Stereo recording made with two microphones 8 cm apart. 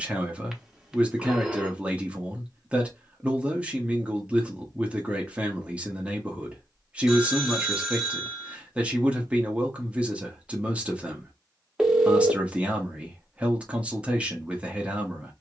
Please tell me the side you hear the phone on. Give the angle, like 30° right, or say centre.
10° right.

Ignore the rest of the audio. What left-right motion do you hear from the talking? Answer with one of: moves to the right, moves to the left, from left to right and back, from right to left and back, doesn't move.
doesn't move.